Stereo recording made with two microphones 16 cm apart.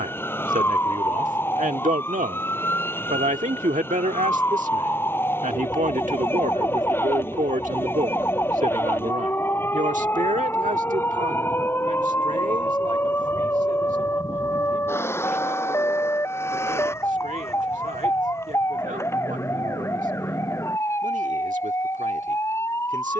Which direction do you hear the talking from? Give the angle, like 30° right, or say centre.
50° right.